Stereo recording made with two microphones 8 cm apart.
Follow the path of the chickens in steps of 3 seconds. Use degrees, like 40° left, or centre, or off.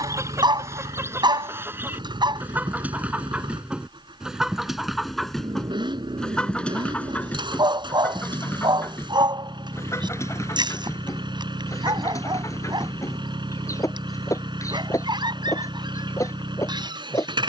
30° right, 10° right, 20° left, 40° left, 40° left, 40° left.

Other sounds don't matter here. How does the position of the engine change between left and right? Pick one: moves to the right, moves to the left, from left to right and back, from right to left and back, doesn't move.
doesn't move.